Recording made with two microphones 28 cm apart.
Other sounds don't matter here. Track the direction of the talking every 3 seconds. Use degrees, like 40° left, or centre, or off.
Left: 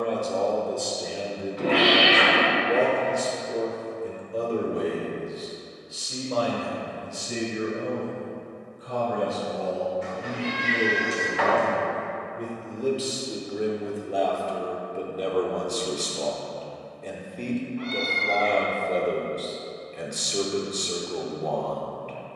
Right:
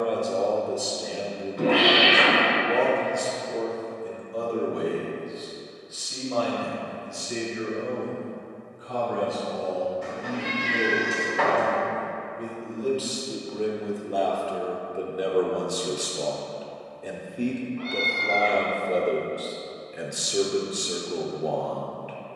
centre, 30° left, 40° left, 50° left, 10° left, 10° right, 10° right, 10° right.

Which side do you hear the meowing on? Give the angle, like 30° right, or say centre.
50° right.